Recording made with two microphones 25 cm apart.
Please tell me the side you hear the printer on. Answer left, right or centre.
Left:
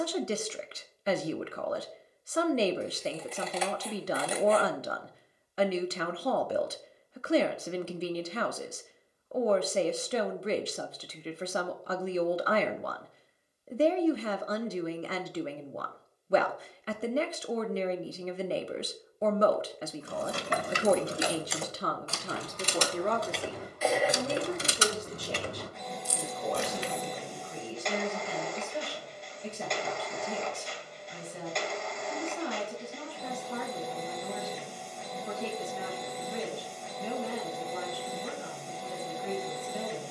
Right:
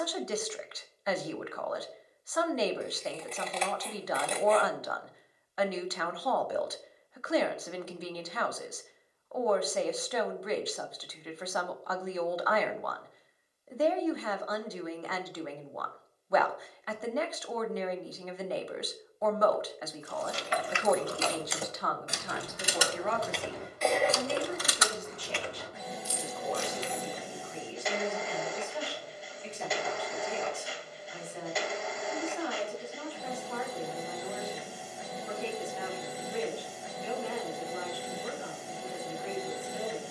centre.